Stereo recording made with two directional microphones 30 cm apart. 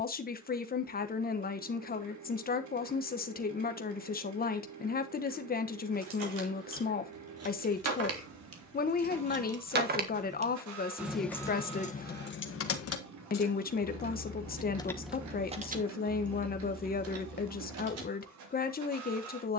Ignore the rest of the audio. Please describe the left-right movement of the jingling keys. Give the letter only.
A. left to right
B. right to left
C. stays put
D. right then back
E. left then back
E.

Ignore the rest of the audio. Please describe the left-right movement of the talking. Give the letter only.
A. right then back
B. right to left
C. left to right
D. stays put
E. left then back
D.